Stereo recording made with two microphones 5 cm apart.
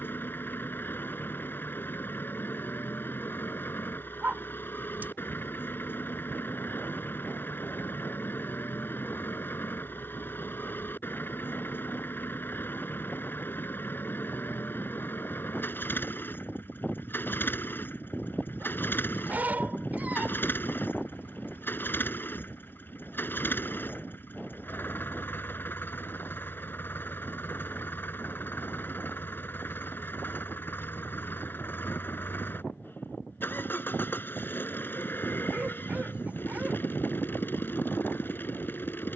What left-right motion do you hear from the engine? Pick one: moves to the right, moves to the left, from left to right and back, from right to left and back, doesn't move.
doesn't move.